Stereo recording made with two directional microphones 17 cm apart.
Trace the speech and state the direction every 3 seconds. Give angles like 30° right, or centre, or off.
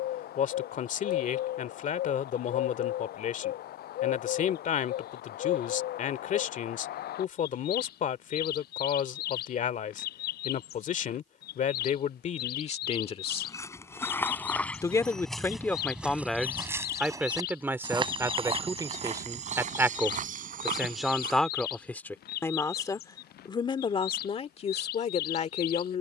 50° left, 50° left, 50° left, 50° left, 40° left, centre, 10° right, 10° left, 40° left.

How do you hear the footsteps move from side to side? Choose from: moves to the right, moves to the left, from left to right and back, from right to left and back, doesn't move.
moves to the right.